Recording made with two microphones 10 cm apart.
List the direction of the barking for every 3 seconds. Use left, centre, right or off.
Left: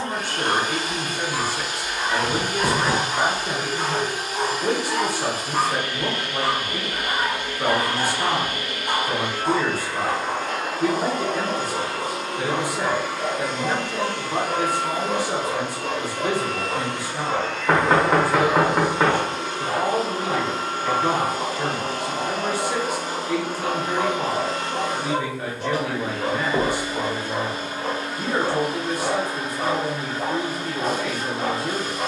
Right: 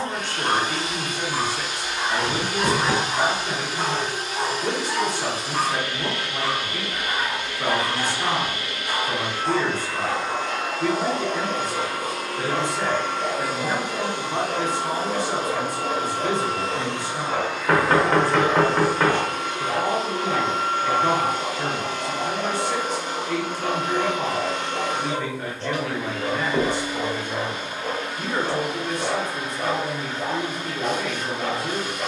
right, centre, left, left, left, left, left, left, left, left, left.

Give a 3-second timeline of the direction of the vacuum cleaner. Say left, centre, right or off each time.
left, left, left, left, centre, right, left, left, left, left, left.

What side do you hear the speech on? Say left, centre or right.
centre.